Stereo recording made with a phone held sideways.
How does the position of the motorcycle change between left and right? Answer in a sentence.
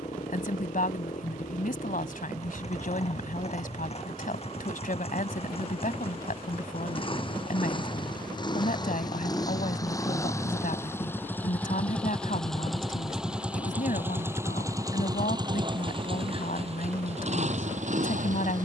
In this clip you hear the motorcycle move to the right.